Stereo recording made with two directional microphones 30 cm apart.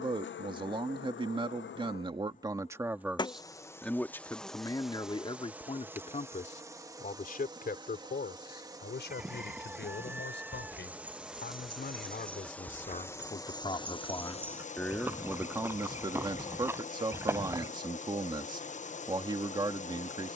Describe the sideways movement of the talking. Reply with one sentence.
In this clip you hear the talking move from right to left and back again.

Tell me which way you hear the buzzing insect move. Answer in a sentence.
In this clip you hear the buzzing insect go right and come back.